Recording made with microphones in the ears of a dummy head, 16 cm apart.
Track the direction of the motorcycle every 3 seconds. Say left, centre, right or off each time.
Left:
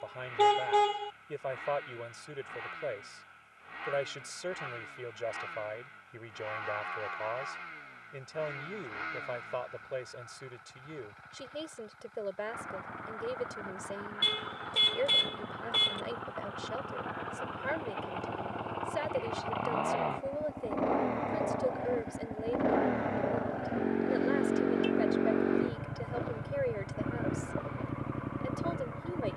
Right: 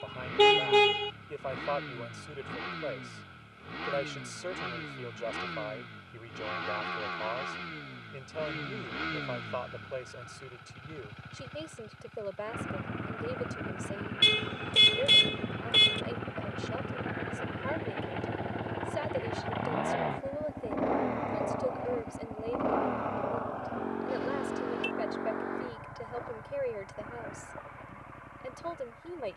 right, right, right, right, right, right, centre, centre, left, left.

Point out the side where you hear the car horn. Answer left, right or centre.
right.